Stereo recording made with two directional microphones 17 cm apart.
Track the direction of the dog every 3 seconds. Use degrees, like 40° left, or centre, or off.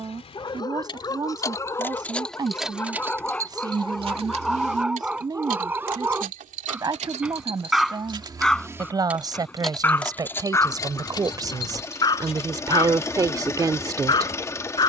20° left, centre, centre, 20° left, 20° left.